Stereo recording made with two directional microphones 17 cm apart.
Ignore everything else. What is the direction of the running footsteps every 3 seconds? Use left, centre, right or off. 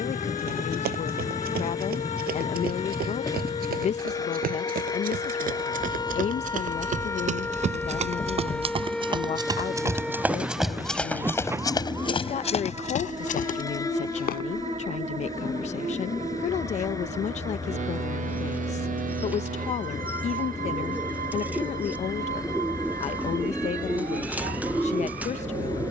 right, right, right, centre, left, off, off, off, off.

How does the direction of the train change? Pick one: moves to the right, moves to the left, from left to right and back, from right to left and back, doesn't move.
doesn't move.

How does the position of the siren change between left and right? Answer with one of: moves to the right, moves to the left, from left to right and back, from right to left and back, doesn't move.
moves to the right.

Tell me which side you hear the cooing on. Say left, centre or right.
centre.